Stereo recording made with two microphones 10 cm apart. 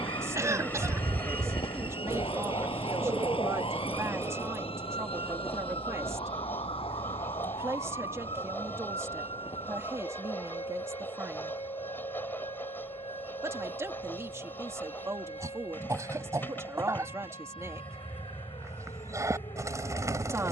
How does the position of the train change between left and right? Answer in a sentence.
In this clip you hear the train stay put.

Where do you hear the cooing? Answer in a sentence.
You can hear the cooing on the right.